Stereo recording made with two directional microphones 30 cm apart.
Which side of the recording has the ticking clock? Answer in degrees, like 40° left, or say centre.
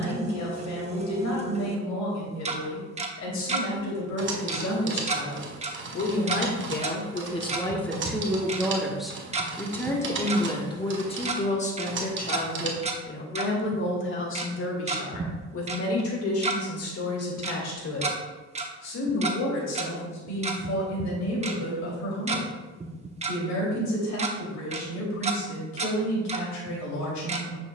20° right.